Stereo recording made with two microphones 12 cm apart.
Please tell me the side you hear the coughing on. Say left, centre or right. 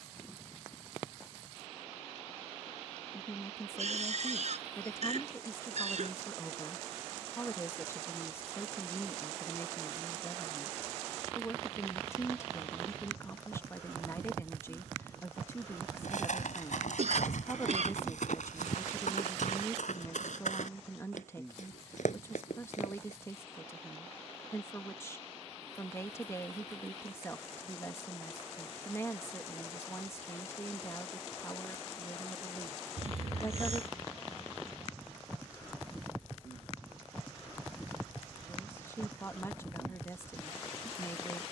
right.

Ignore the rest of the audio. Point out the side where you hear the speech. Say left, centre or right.
left.